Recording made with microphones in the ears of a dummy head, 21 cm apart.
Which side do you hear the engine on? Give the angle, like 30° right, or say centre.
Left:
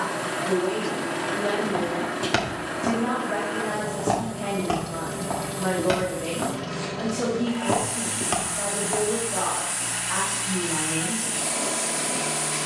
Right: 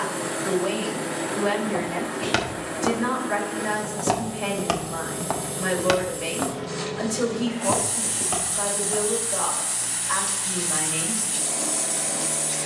30° left.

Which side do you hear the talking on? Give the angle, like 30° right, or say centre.
80° right.